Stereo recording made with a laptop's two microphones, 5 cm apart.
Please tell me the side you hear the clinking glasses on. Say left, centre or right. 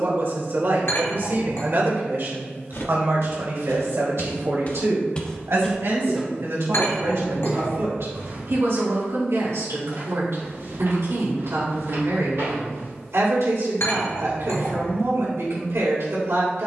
left.